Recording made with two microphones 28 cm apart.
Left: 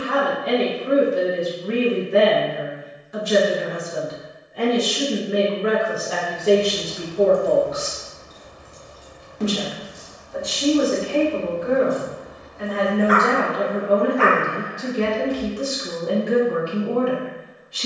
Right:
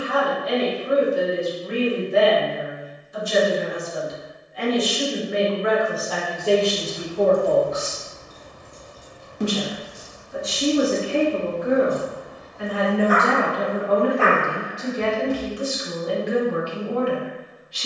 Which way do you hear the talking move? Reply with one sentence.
In this clip you hear the talking move from left to right and back again.